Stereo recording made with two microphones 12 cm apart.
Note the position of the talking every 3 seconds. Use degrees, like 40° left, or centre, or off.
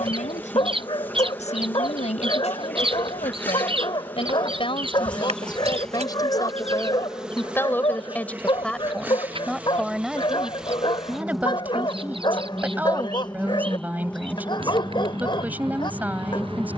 70° left, 50° left, 20° left, 10° right, 10° right, 10° right.